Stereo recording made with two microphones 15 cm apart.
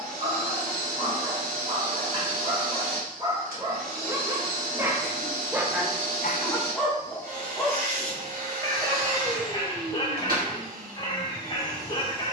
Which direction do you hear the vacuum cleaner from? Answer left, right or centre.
right.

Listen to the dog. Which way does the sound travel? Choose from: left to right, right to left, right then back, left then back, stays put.
right to left.